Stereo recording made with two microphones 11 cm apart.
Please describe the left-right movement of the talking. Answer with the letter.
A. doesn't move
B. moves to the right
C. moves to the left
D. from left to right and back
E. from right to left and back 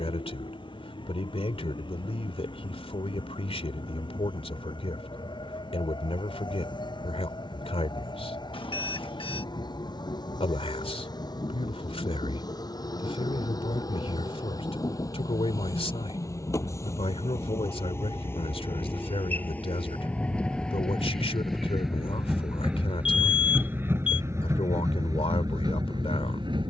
A.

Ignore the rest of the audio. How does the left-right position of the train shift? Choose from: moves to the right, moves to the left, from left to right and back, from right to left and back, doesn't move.
moves to the right.